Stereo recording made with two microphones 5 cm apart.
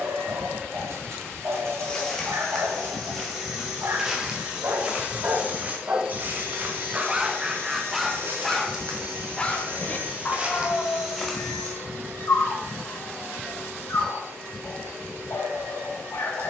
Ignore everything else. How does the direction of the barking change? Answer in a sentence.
You can hear the barking move from right to left.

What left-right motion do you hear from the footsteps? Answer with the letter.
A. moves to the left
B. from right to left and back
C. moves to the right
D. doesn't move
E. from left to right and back
E.